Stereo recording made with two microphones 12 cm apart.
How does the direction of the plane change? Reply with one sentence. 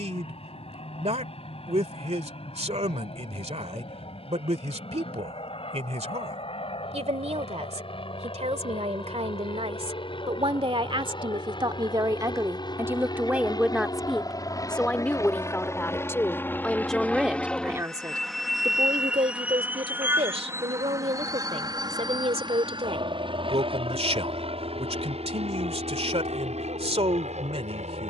In this clip you hear the plane go from the left side to the right.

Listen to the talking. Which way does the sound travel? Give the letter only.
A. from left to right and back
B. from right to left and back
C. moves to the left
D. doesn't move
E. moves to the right
B.